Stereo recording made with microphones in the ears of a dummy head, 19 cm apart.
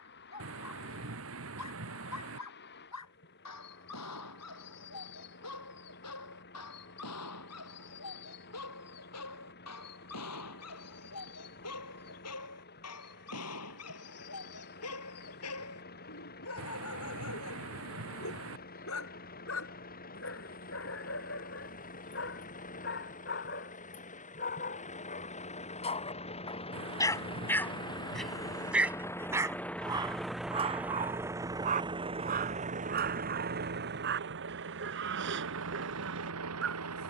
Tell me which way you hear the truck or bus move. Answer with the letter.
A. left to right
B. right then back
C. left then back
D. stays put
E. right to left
A.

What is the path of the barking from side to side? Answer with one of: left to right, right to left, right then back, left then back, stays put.
left to right.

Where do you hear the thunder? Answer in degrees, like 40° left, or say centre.
60° right.